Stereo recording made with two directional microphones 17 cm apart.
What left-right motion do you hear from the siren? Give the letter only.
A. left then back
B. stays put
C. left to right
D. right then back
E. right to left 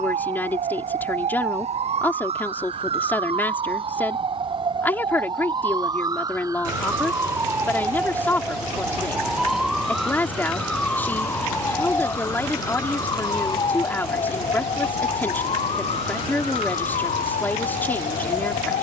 E.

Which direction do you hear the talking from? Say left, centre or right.
centre.